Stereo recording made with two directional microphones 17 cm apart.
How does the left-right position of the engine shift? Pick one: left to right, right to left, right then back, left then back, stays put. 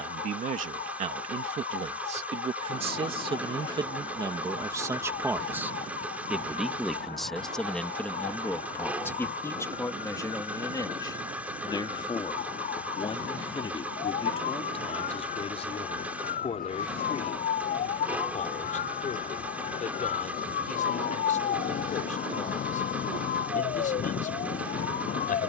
stays put.